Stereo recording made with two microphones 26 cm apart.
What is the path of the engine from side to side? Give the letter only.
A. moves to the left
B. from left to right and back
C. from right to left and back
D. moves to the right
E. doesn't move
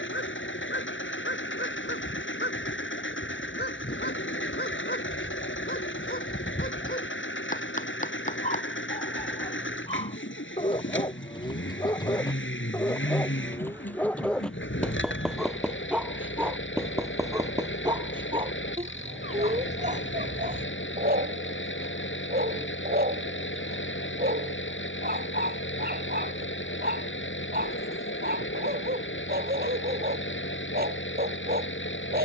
E.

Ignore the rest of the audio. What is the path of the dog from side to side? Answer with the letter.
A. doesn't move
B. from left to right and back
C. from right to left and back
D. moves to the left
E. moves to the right
E.